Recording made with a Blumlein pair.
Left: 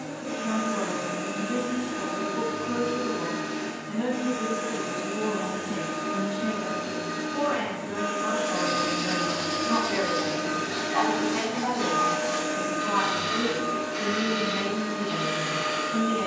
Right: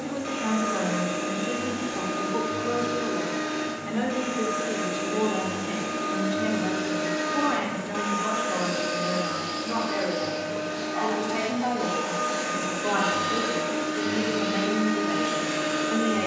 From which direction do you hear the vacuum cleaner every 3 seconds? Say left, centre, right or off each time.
right, right, right, left, right, right.